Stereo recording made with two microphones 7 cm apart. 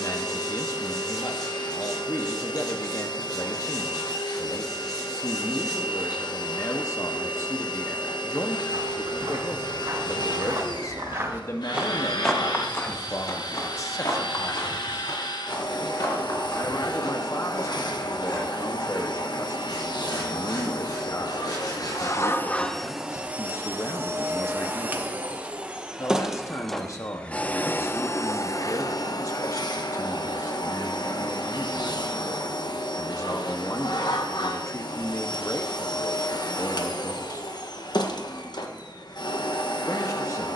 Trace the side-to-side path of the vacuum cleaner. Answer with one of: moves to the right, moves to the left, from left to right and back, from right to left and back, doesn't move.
from left to right and back.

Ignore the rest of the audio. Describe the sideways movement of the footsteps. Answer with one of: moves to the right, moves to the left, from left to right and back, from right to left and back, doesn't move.
moves to the left.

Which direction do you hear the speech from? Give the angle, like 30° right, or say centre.
50° left.